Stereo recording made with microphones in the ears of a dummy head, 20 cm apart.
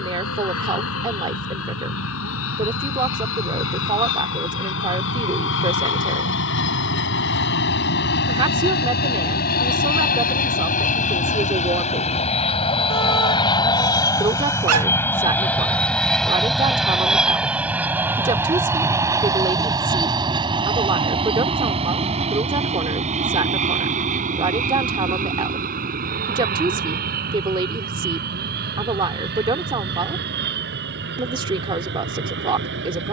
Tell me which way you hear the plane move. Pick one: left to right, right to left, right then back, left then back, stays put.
left to right.